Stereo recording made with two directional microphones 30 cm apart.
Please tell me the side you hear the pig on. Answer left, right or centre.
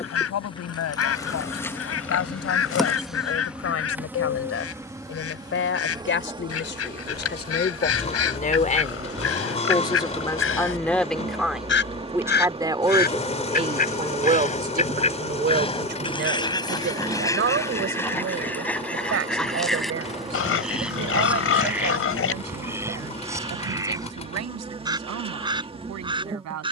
left.